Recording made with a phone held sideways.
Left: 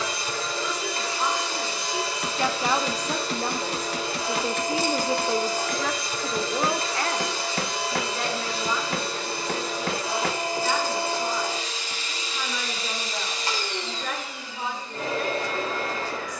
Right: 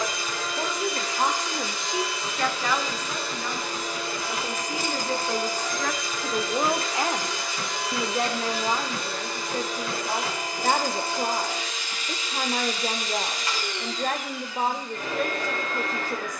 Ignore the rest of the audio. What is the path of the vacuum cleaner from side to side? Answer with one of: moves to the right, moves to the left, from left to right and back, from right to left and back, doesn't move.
doesn't move.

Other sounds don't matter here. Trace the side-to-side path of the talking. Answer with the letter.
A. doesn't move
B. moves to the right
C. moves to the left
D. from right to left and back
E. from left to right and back
D.